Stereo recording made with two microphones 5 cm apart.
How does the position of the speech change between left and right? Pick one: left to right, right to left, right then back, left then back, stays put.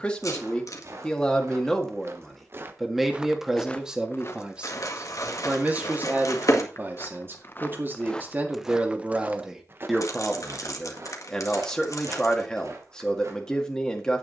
right then back.